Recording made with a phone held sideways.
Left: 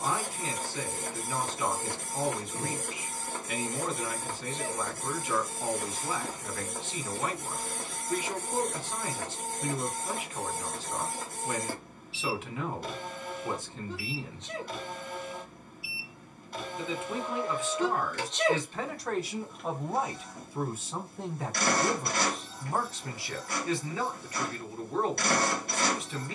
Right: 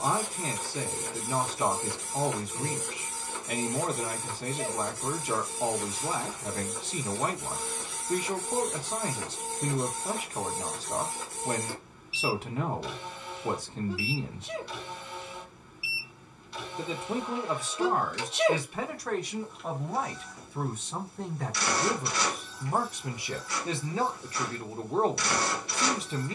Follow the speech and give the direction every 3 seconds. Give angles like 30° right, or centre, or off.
40° right, 40° right, 40° right, 40° right, 40° right, 40° right, centre, 10° right, 30° right.